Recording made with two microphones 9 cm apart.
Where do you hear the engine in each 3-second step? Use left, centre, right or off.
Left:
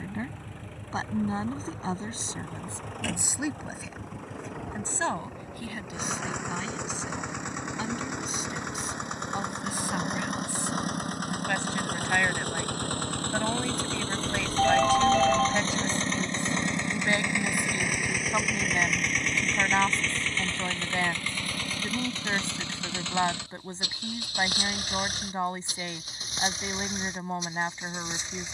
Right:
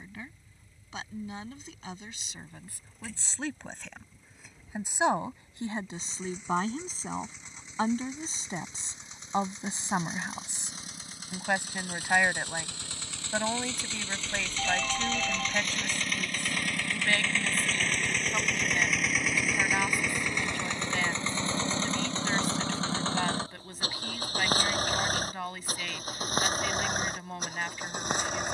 left, left, left, left, left, left, centre, right, right, right.